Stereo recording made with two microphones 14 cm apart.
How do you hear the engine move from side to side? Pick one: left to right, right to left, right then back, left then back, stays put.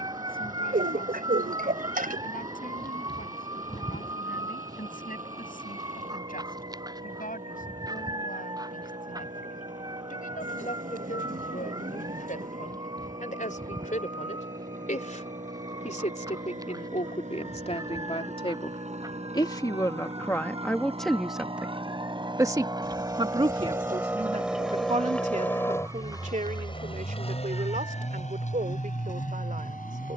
right to left.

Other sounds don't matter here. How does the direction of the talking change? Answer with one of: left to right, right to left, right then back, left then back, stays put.
left to right.